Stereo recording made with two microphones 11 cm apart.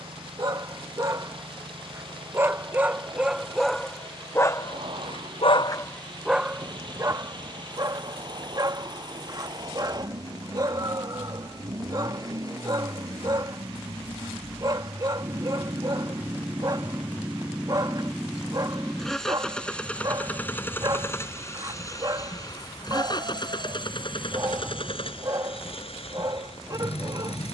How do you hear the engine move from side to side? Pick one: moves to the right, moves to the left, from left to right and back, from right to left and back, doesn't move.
moves to the left.